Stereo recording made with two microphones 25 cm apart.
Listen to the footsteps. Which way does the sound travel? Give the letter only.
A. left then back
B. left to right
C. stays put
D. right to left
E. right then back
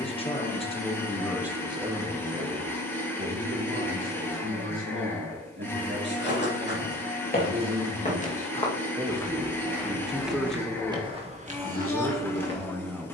B.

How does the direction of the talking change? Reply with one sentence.
You can hear the talking go right and come back.